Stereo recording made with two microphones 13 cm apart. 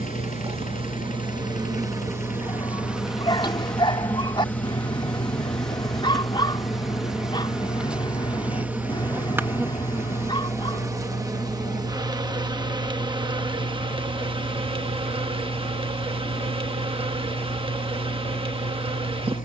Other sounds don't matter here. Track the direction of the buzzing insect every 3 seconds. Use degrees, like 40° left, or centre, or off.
30° right, 10° left, centre, 20° right, 40° right, 40° right, 40° right.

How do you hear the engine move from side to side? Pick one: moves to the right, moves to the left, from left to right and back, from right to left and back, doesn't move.
doesn't move.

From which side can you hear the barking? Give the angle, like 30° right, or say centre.
40° left.